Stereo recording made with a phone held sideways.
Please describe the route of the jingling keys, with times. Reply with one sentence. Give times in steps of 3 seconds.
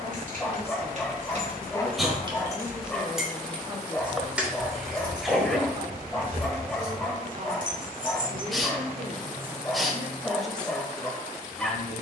In this clip you hear the jingling keys on the right from 0 s, in the centre from 3 s, on the right from 6 s and not at all from 9 s.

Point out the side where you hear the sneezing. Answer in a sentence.
You can hear the sneezing in the centre.